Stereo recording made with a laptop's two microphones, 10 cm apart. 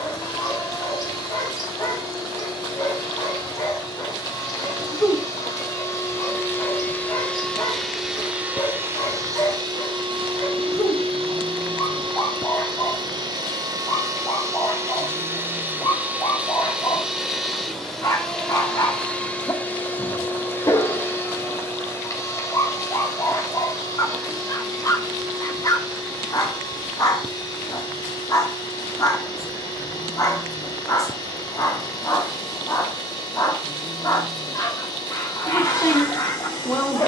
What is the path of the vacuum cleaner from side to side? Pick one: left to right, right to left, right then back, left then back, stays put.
right then back.